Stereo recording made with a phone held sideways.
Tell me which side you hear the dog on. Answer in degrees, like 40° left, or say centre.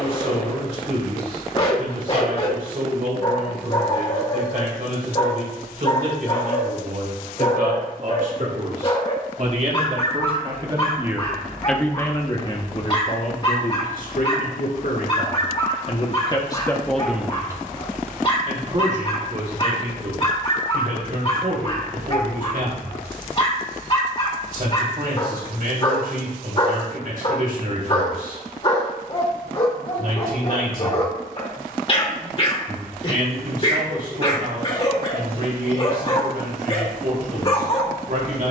40° left.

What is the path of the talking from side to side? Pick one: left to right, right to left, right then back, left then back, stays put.
left then back.